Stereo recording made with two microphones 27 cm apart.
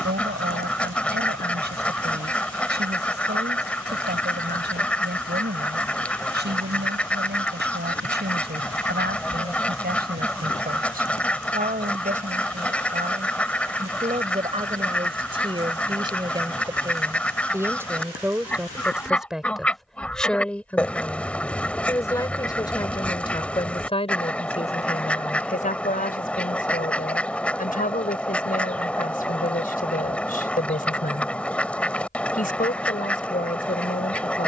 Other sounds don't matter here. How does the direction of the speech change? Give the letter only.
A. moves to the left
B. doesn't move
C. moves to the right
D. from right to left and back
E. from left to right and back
A.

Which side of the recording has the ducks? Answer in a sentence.
In this clip you hear the ducks in the centre.